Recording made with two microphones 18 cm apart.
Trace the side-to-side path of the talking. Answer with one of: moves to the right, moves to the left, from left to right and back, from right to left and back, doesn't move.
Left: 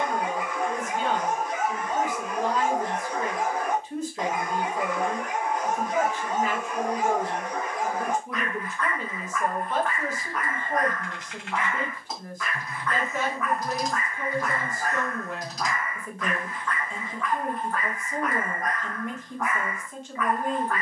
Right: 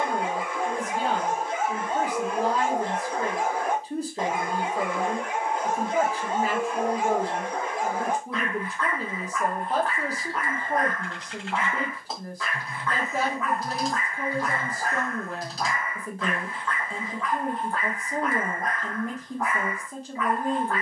doesn't move.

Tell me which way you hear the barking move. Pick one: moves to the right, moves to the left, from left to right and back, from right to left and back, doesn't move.
doesn't move.